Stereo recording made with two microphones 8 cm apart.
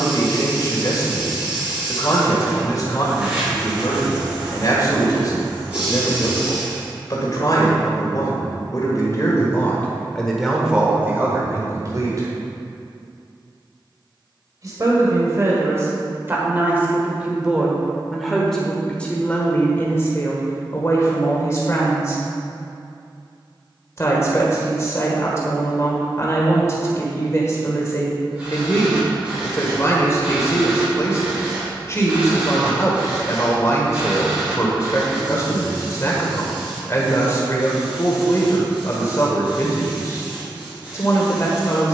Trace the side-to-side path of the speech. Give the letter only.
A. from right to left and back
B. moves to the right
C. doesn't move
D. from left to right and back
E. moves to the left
D.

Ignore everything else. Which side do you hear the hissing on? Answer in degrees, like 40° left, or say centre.
20° right.